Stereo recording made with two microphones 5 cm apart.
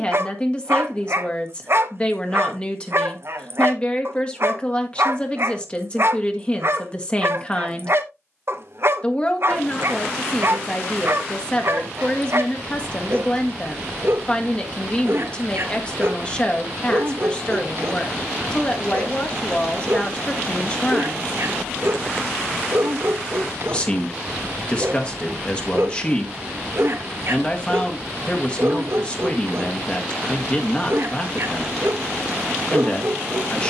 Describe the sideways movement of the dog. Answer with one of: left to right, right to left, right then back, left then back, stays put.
stays put.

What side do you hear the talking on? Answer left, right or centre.
left.